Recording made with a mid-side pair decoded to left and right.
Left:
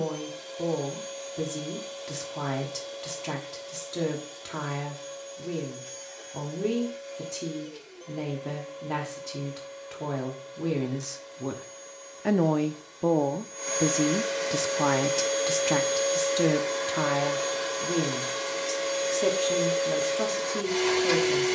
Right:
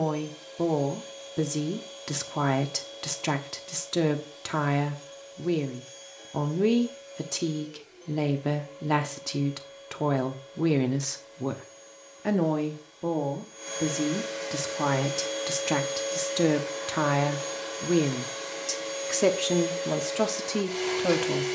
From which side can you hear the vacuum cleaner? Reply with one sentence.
You can hear the vacuum cleaner on the left.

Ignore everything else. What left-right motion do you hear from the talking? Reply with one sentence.
You can hear the talking go left and come back.